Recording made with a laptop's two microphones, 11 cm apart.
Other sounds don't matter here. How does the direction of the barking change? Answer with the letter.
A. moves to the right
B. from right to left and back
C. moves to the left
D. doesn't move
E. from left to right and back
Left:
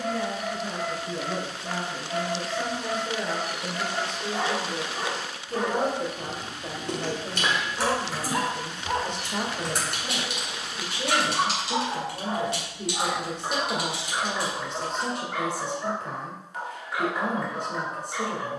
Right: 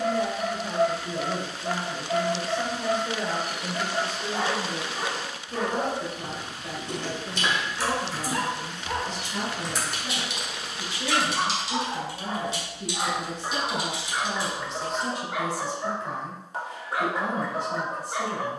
B.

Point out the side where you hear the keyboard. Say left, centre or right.
left.